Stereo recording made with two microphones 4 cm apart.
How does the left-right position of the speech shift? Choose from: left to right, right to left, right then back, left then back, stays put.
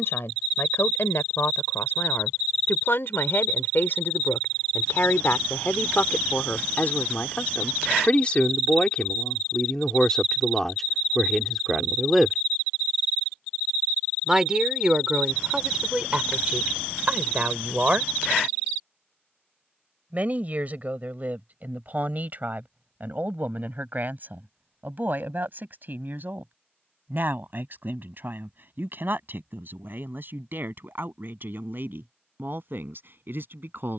left to right.